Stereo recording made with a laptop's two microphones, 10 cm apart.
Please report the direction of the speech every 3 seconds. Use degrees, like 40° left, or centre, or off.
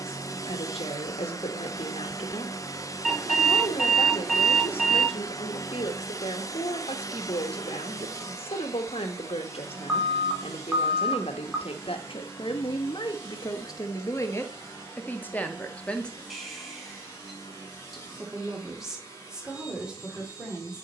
70° left, 70° left, 70° left, 70° left, 40° left, 10° left, 10° right.